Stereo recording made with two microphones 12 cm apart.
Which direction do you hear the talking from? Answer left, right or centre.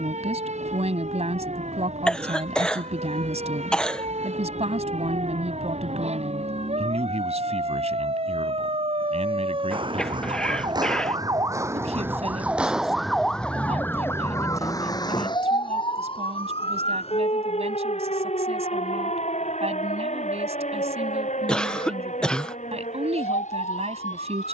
right.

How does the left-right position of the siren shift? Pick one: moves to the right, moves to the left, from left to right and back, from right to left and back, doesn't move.
moves to the left.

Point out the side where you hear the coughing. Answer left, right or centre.
centre.